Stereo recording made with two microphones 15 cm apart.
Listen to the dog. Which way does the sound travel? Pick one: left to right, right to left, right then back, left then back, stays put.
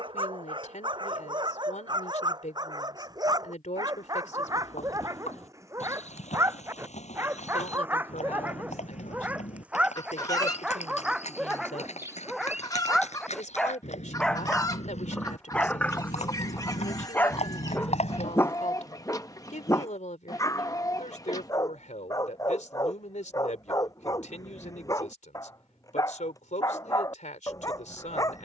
right to left.